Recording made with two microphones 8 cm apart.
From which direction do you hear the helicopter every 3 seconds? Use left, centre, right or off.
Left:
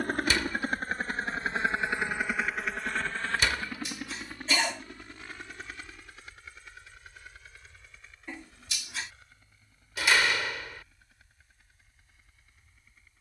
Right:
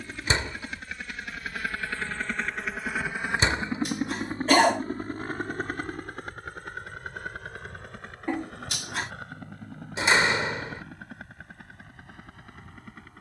left, right, right, right, right.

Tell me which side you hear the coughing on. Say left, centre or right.
right.